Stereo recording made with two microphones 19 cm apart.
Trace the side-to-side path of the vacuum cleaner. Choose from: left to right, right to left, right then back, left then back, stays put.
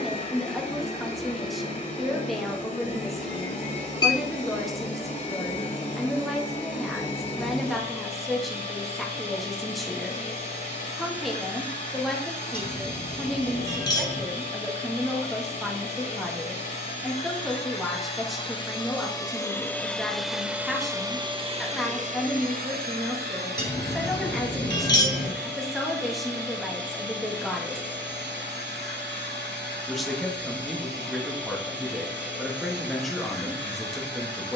left to right.